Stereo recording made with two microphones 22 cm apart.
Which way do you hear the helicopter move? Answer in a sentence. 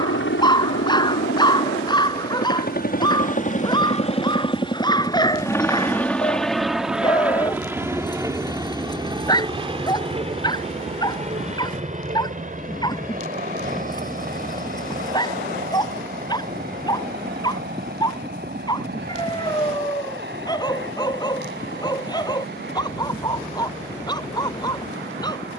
You can hear the helicopter move to the right.